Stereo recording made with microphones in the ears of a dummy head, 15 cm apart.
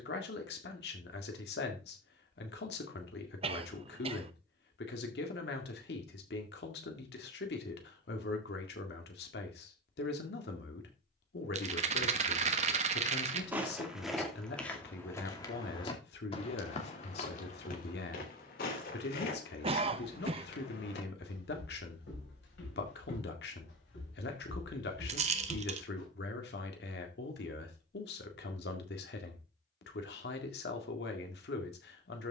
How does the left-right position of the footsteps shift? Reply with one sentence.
You can hear the footsteps travel towards the left.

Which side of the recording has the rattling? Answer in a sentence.
You can hear the rattling on the right.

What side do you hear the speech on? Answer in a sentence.
In this clip you hear the speech on the left.